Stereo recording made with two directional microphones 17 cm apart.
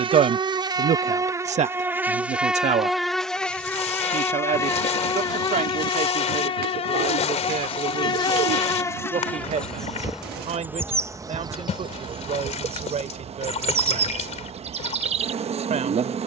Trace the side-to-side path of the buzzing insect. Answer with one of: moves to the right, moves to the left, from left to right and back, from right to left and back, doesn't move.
from right to left and back.